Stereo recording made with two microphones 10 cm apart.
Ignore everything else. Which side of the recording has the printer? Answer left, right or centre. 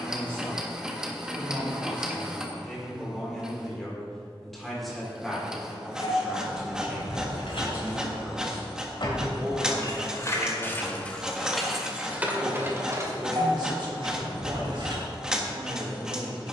centre.